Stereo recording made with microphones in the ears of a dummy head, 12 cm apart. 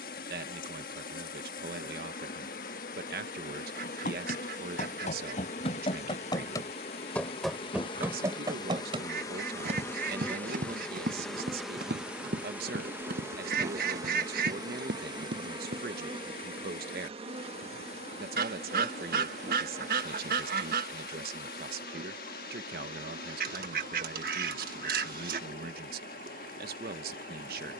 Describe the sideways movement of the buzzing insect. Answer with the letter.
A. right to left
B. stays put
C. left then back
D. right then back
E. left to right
E.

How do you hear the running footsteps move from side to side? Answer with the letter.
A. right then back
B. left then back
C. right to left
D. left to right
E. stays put
D.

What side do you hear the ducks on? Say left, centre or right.
right.